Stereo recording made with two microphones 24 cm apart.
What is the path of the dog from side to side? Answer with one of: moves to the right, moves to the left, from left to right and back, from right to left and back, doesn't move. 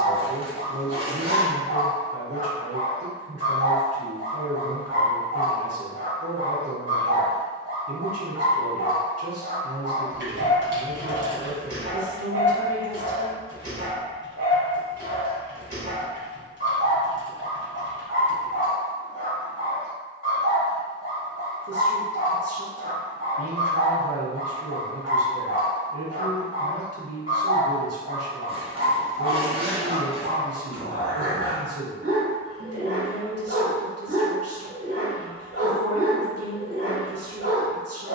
doesn't move.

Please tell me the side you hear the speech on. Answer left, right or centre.
right.